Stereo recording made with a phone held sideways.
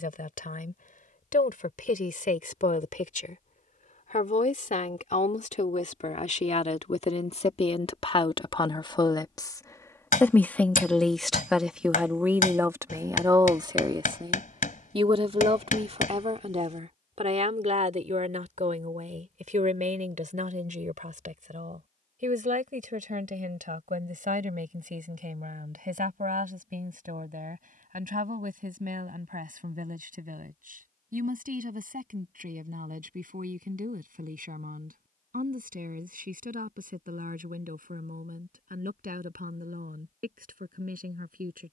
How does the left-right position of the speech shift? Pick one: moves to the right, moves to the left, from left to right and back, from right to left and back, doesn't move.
moves to the right.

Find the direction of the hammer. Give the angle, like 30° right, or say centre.
70° left.